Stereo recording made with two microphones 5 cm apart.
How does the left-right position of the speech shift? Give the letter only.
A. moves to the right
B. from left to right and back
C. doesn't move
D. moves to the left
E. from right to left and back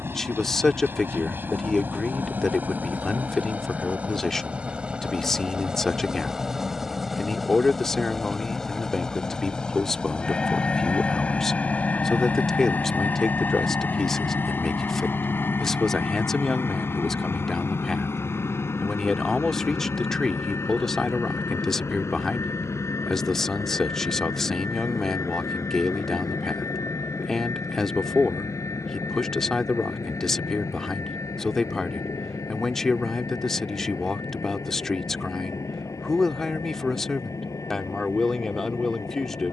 C.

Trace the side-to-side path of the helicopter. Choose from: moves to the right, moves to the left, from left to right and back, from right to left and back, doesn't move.
moves to the left.